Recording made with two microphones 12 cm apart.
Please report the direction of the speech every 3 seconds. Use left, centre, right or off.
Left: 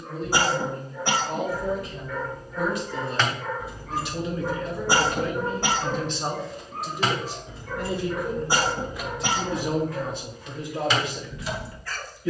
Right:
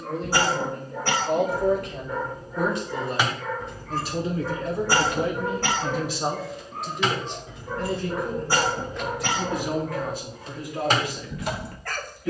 right, right, centre, left.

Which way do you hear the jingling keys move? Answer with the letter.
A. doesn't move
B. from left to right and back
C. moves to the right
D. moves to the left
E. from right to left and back
E.